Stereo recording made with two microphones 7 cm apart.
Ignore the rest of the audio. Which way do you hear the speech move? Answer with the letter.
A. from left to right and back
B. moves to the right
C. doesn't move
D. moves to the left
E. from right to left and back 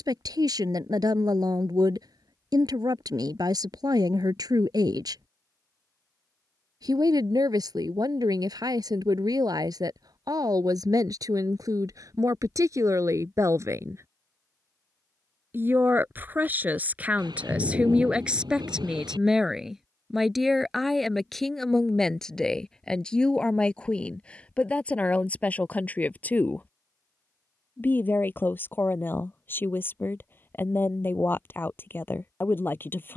D.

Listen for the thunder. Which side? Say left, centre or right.
right.